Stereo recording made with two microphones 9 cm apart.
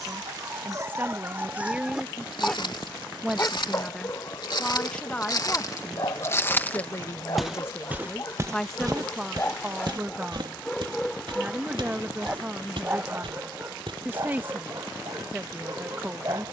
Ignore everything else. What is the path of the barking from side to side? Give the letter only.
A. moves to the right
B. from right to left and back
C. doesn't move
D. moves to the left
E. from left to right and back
B.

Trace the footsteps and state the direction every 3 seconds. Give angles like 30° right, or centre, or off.
70° left, 50° left, 10° right, 60° right, 80° right, off.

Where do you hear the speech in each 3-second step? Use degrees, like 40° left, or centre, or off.
20° right, 10° left, 20° left, 20° right, 20° right, 20° right.